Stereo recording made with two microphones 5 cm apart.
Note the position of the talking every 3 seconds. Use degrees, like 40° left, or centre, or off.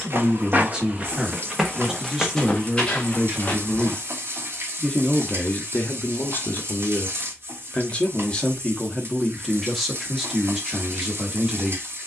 10° right, 10° left, 30° left, centre.